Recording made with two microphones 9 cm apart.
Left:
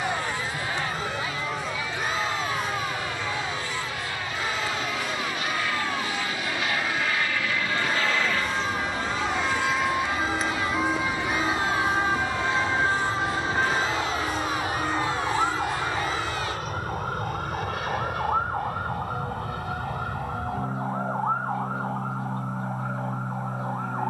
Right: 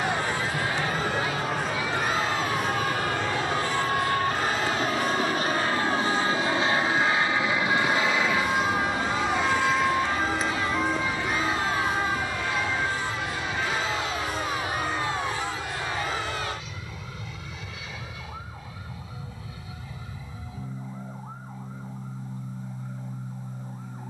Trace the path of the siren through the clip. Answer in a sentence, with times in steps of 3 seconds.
In this clip you hear the siren on the right from 0 s, in the centre from 9 s and on the left from 12 s.